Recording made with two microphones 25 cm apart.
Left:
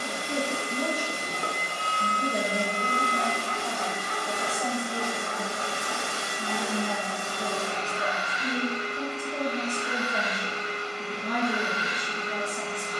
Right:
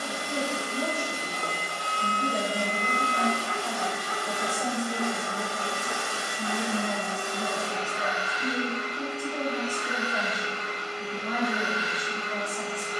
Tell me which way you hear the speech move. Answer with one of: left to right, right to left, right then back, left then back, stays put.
right then back.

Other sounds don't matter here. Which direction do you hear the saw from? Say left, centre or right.
left.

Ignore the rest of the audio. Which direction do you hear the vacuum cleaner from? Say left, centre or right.
left.